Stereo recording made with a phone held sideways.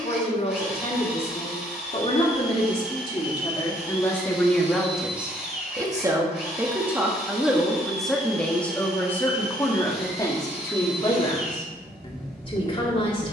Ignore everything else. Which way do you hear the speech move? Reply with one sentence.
You can hear the speech go right and come back.